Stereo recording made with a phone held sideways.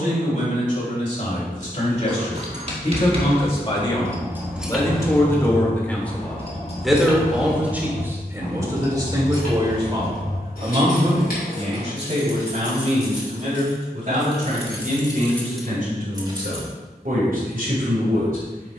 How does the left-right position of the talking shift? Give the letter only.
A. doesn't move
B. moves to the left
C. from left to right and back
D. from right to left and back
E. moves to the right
E.